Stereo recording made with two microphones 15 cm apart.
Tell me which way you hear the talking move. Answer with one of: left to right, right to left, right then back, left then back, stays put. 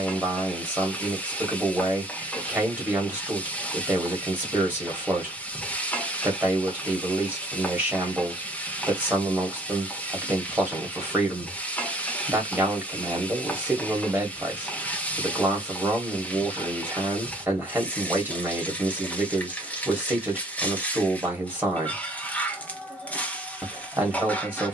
stays put.